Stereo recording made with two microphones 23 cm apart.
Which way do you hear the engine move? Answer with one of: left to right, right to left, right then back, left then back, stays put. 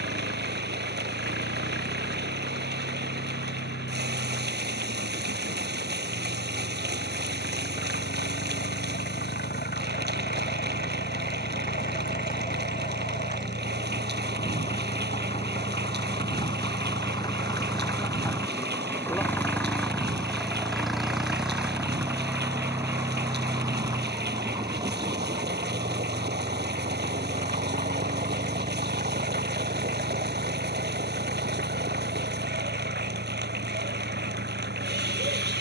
left to right.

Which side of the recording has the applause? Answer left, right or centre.
right.